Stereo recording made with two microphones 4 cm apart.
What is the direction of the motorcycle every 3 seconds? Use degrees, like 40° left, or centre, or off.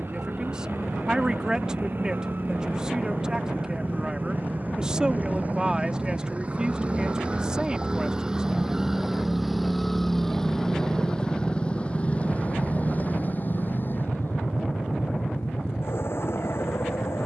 50° right, 40° right, 20° right, 10° left, 40° left, 60° left.